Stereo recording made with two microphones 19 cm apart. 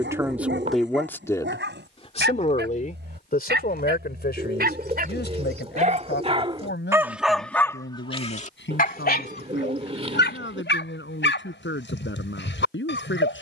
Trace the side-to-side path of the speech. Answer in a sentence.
In this clip you hear the speech go from the right side to the left.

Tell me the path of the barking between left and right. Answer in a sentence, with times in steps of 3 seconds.
In this clip you hear the barking on the right from 0 s, in the centre from 6 s and on the left from 9 s.